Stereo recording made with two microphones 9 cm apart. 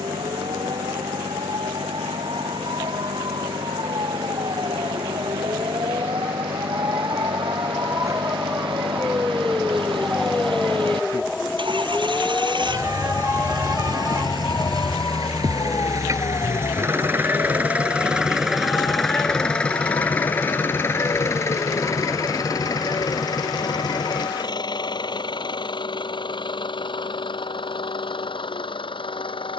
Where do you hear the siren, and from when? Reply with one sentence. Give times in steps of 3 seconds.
You can hear the siren on the right from 0 s, in the centre from 9 s and on the left from 12 s.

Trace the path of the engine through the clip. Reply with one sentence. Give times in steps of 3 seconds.
In this clip you hear the engine on the right from 0 s, in the centre from 18 s and on the left from 21 s.